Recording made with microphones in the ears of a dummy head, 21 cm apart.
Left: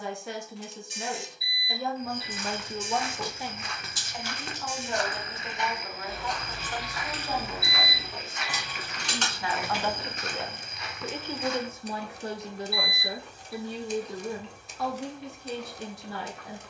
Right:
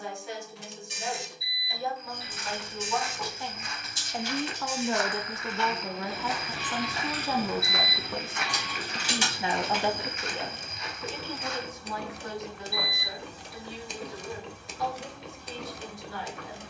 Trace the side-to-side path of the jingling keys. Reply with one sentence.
In this clip you hear the jingling keys go from the left side to the right.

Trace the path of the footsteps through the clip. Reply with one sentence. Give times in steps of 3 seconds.
In this clip you hear the footsteps on the left from 0 s, on the right from 6 s, on the left from 9 s and not at all from 12 s.